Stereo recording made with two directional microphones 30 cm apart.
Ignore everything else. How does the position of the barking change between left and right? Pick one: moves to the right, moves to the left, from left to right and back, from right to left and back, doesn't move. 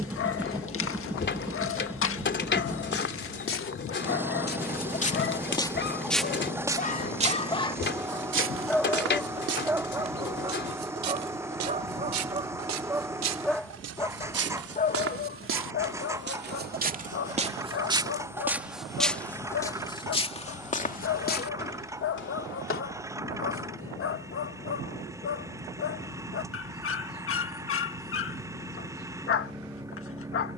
from left to right and back.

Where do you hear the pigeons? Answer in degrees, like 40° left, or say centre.
40° left.